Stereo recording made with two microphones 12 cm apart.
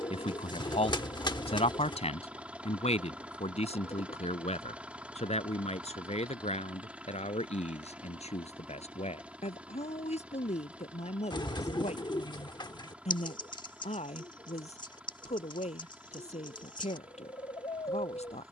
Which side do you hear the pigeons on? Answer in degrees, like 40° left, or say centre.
40° left.